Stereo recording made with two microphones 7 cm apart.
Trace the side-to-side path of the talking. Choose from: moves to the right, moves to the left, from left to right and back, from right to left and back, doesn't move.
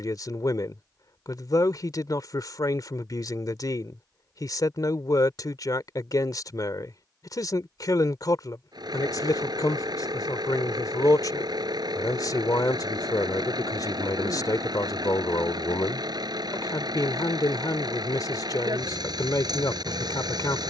doesn't move.